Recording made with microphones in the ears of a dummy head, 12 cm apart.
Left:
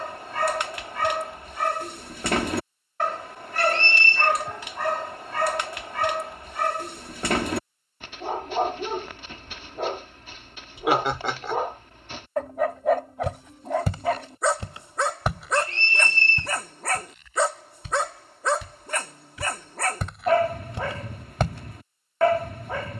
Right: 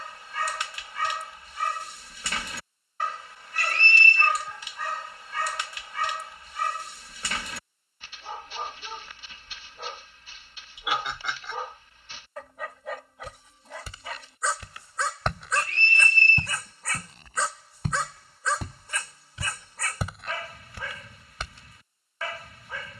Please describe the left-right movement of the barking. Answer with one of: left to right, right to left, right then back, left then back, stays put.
stays put.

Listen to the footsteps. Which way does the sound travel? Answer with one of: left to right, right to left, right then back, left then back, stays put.
right then back.